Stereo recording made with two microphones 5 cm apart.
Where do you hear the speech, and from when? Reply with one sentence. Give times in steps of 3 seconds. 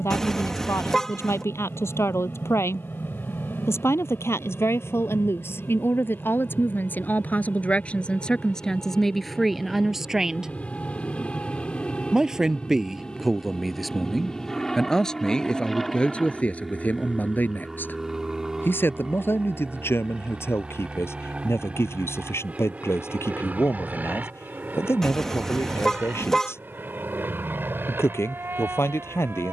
You can hear the speech on the left from 0 s, in the centre from 9 s and on the left from 15 s.